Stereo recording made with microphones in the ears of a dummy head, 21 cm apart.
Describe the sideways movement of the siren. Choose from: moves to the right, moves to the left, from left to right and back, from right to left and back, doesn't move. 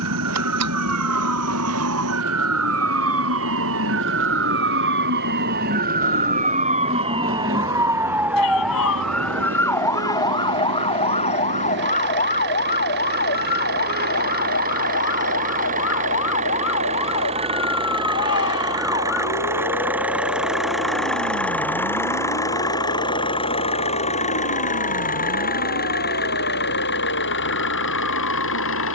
moves to the left.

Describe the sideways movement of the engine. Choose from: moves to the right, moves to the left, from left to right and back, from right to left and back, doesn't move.
moves to the left.